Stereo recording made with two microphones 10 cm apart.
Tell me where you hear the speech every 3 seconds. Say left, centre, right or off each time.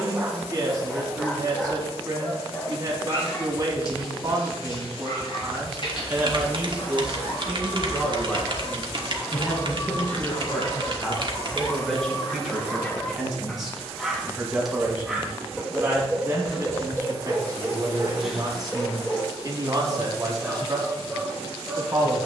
right, right, centre, centre, centre, right, right, right.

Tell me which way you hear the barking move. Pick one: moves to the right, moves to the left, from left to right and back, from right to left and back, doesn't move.
from right to left and back.